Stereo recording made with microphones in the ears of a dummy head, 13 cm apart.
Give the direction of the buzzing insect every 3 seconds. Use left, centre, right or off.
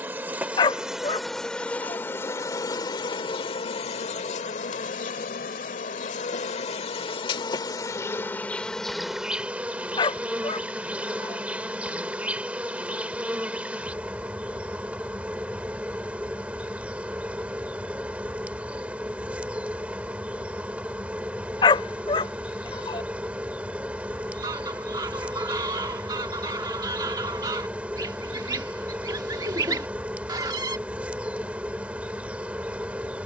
centre, left, left, centre, centre, centre, centre, centre, centre, centre, centre.